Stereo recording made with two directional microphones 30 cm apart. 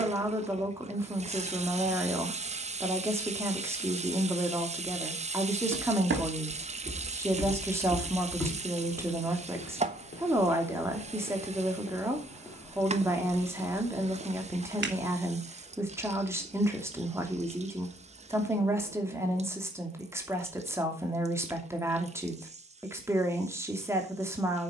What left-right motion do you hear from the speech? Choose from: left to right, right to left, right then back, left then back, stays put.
stays put.